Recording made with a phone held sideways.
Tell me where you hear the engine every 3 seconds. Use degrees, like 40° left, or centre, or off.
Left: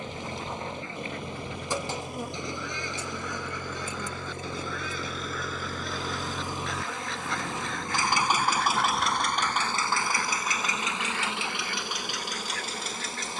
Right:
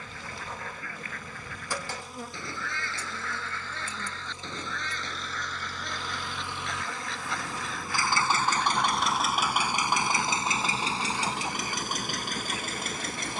70° left, 60° left, 30° left, 30° right, 50° right.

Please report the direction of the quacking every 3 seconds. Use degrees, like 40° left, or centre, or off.
20° left, 10° left, centre, 10° right, 20° right.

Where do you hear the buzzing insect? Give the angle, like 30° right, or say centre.
20° left.